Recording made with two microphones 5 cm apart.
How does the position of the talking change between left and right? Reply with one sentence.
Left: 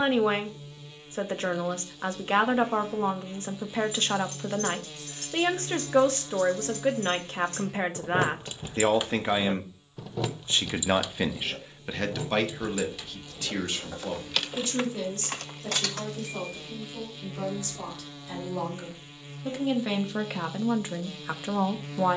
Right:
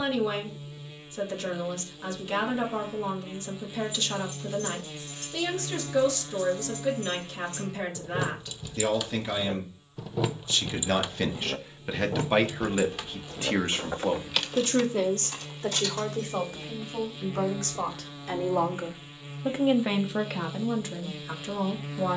You can hear the talking move from left to right and back again.